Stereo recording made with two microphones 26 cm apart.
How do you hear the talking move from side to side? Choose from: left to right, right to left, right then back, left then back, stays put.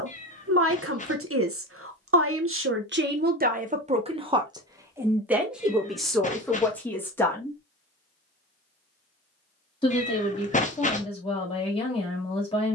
right to left.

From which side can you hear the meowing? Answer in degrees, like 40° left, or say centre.
30° left.